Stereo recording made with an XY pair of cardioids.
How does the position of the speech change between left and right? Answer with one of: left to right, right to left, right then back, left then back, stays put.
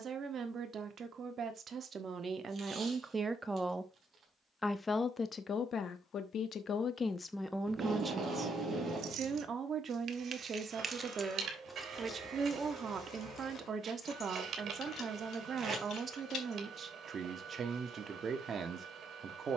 left then back.